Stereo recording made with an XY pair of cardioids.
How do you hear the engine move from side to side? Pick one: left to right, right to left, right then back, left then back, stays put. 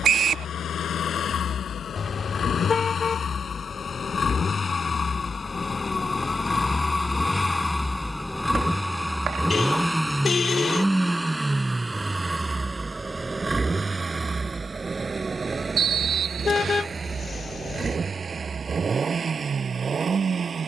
left to right.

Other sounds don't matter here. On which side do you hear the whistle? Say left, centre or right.
right.